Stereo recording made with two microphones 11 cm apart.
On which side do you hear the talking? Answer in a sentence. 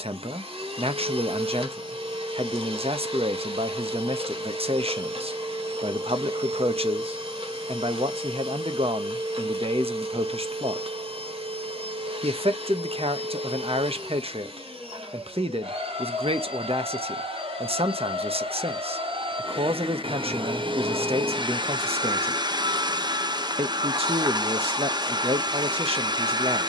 In this clip you hear the talking on the right.